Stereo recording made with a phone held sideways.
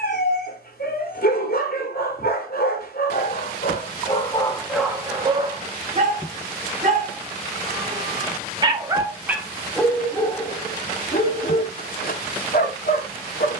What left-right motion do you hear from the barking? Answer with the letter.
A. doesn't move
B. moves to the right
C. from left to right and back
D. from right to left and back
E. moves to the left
C.